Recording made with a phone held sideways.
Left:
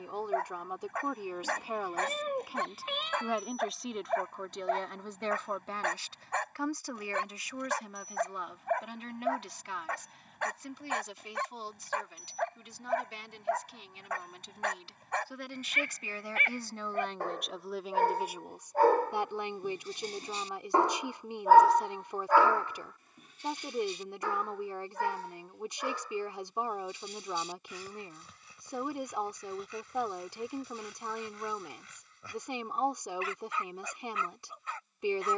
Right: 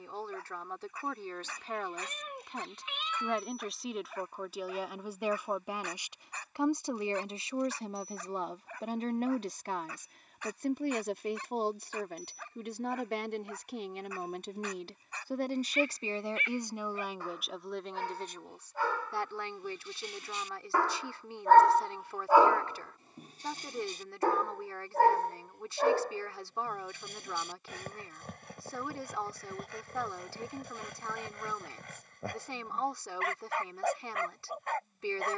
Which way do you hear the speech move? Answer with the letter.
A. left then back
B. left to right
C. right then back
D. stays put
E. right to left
C.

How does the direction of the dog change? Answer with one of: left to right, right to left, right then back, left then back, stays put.
left to right.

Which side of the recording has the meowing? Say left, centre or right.
left.